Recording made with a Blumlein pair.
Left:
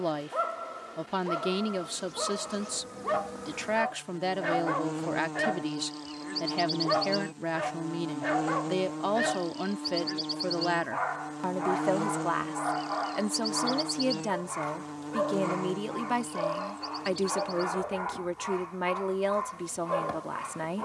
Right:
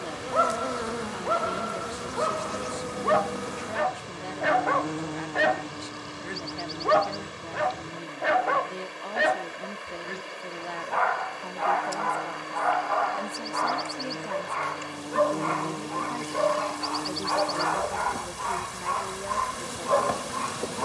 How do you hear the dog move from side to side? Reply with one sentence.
In this clip you hear the dog stay in one place.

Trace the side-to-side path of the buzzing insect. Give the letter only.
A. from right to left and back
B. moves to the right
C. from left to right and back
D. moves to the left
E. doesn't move
A.